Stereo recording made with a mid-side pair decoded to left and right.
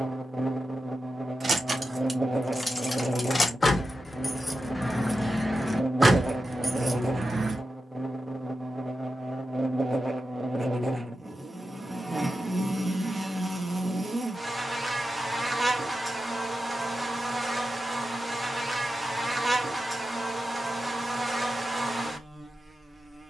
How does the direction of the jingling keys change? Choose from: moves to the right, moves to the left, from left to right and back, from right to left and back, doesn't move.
from right to left and back.